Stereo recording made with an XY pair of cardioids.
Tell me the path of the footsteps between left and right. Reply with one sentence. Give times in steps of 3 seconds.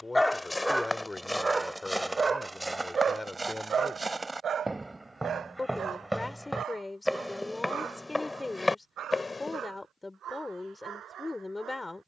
You can hear the footsteps in the centre from 0 s and on the left from 9 s.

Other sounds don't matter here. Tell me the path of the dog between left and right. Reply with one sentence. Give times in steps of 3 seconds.
You can hear the dog in the centre from 0 s and on the right from 3 s.